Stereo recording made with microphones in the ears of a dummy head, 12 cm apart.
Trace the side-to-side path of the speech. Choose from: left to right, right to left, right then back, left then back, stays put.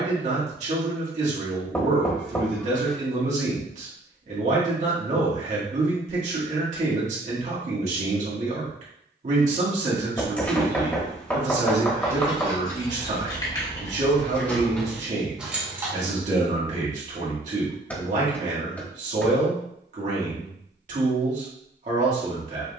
stays put.